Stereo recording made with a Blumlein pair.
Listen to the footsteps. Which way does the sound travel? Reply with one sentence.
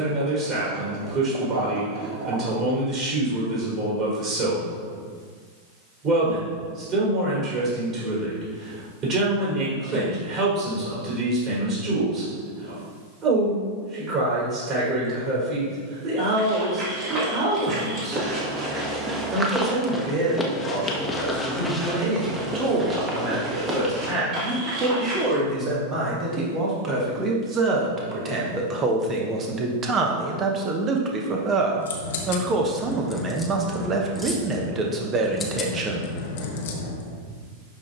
You can hear the footsteps move from right to left and back again.